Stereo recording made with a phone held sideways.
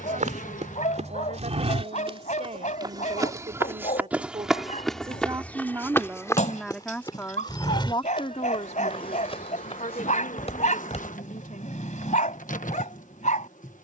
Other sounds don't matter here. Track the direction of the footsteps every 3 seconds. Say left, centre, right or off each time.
right, centre, left, left, off.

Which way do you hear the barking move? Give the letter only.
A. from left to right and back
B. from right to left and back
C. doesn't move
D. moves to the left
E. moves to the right
C.